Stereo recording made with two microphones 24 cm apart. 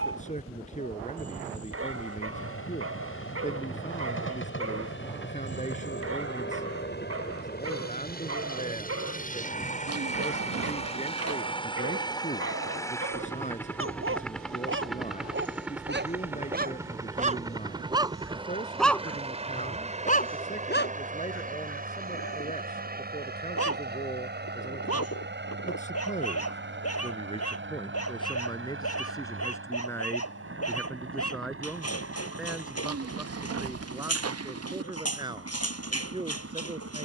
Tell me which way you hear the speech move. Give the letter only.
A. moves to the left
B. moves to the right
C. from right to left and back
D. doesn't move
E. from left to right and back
B.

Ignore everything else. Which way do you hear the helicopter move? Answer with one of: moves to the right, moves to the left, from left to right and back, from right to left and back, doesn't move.
moves to the right.